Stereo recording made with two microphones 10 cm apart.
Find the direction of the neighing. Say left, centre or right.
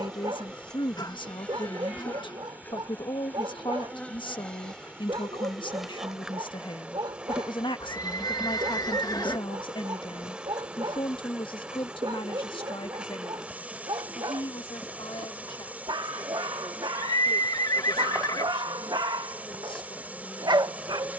left.